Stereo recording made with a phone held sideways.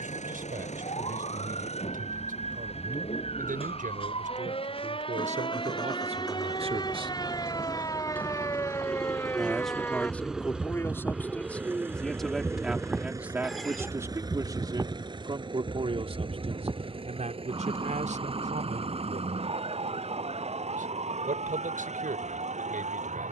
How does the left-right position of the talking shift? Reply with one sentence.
You can hear the talking go left and come back.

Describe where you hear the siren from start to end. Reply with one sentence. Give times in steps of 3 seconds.
In this clip you hear the siren on the left from 0 s, in the centre from 9 s and on the right from 15 s.